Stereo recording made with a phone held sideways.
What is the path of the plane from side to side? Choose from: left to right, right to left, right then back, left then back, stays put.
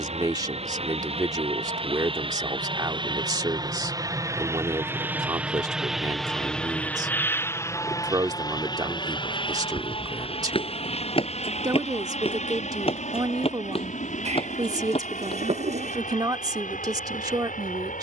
right to left.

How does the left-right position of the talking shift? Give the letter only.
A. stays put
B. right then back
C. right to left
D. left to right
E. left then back
A.